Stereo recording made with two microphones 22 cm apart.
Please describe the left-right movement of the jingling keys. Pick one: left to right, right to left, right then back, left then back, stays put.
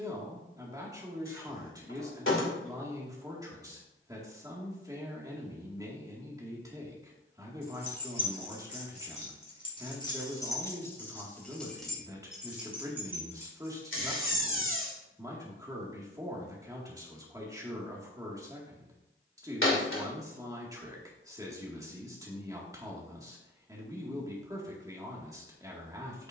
left to right.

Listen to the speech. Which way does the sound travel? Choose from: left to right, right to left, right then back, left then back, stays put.
stays put.